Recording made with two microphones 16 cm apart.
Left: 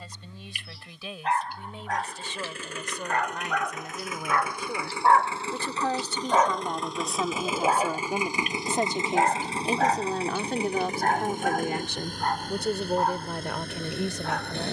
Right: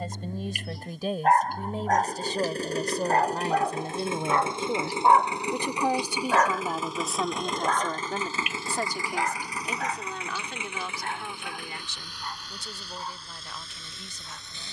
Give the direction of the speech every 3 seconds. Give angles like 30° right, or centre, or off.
40° right, 30° right, centre, 40° left, 70° left.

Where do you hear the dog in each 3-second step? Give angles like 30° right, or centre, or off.
50° right, 20° right, 20° left, 50° left, 70° left.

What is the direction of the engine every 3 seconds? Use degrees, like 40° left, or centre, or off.
40° right, 20° right, centre, 30° left, 50° left.